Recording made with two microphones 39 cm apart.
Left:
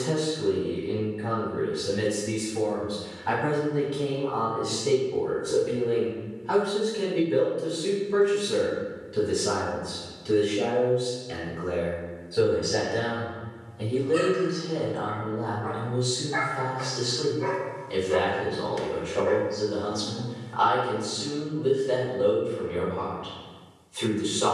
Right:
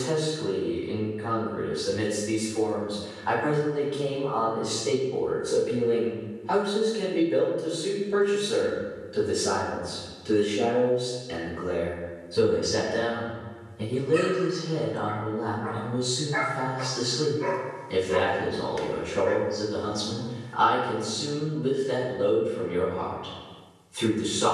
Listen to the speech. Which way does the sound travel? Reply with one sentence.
You can hear the speech move from left to right.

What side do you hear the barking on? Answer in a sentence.
You can hear the barking on the left.